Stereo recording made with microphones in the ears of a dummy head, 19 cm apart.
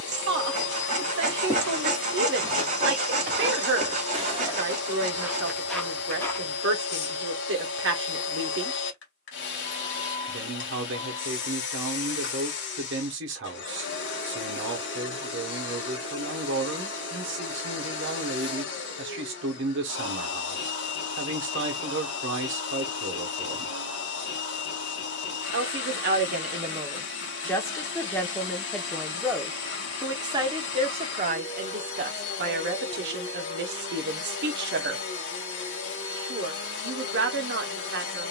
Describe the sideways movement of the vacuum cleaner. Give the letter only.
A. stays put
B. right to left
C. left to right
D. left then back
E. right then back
A.